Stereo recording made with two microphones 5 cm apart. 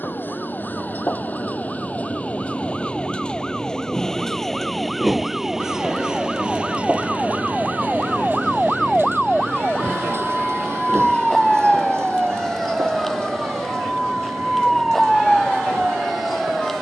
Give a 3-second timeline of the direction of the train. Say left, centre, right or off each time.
left, centre, right, right, right, right.